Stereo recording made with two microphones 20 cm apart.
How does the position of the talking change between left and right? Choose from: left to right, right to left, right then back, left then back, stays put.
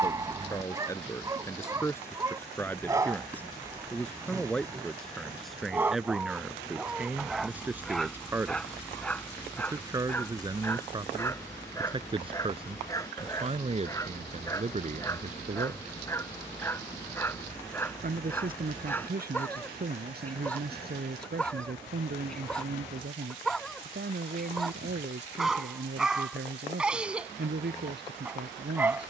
left to right.